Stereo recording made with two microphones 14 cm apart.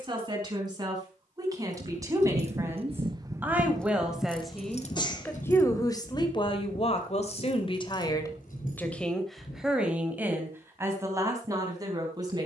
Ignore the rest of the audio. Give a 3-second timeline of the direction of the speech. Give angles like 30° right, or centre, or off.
30° right, centre, 40° left, 10° right.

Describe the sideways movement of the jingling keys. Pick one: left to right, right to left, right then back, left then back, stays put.
right to left.